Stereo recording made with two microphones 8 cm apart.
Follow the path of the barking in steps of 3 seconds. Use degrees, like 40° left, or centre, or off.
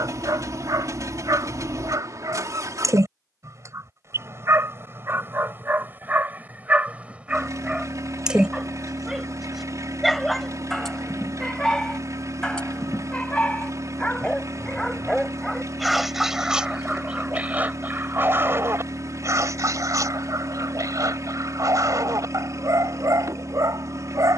50° right, 30° right, 20° right, 10° left, 10° left, 10° right, 40° right, 50° right.